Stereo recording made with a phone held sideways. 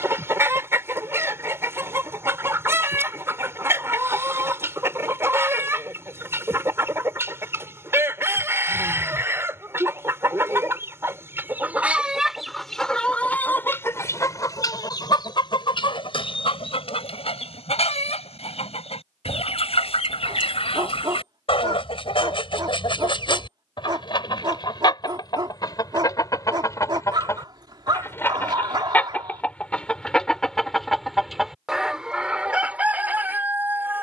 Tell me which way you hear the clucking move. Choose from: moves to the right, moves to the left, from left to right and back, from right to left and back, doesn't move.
from right to left and back.